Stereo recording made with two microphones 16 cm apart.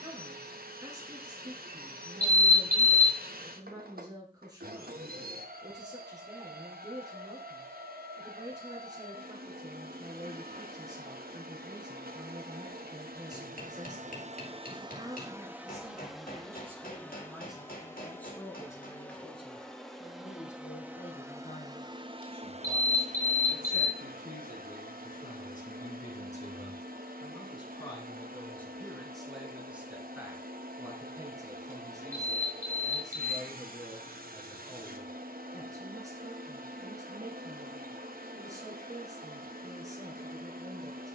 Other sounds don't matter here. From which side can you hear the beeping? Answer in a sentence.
In this clip you hear the beeping on the right.